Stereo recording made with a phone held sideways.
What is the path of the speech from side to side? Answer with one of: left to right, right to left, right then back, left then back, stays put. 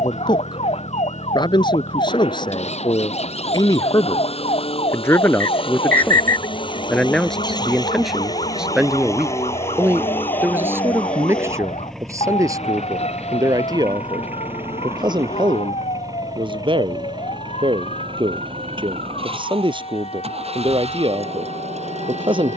left to right.